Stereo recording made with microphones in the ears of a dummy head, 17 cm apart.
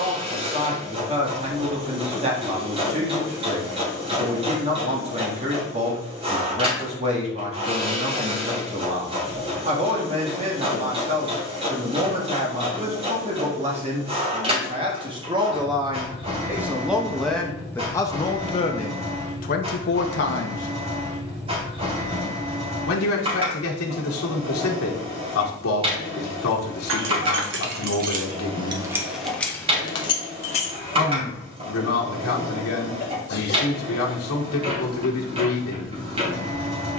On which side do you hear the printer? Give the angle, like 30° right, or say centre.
30° right.